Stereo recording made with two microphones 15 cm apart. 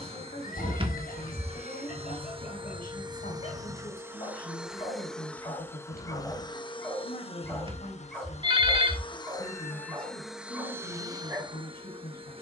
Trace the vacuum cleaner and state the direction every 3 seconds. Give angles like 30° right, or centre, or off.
40° right, 10° right, 40° left, 10° right.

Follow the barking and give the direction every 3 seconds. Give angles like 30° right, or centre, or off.
60° left, 40° left, 10° left, 20° right.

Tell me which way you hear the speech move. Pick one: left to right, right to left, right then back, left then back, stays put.
stays put.